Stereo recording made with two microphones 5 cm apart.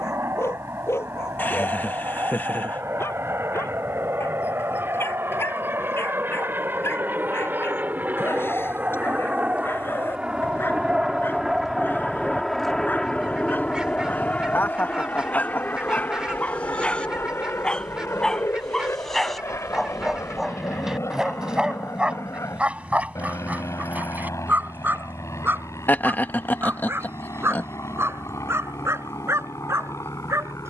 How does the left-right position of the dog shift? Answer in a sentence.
In this clip you hear the dog move from left to right.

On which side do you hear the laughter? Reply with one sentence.
You can hear the laughter on the left.